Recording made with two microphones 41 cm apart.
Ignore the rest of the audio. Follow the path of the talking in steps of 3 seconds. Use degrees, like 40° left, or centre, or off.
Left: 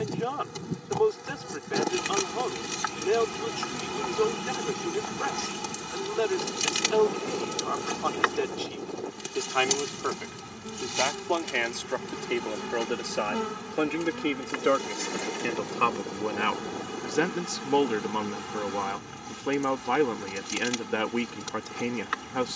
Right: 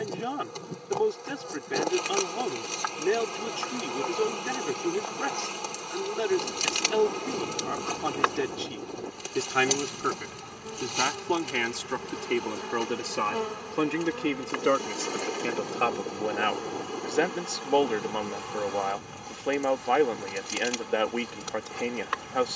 40° right, 40° right, 40° right, 30° right, 10° right, 10° left, 20° left, 20° left.